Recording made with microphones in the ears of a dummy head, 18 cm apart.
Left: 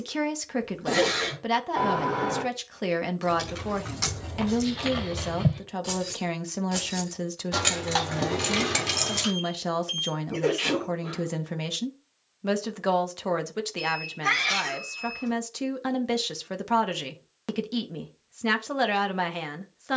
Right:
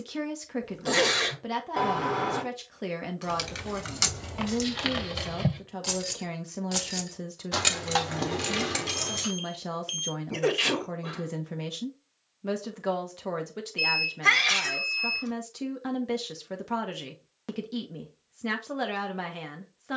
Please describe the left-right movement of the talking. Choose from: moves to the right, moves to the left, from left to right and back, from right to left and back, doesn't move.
doesn't move.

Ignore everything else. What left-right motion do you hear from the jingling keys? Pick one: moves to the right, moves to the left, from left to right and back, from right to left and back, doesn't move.
moves to the left.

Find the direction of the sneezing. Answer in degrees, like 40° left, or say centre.
40° right.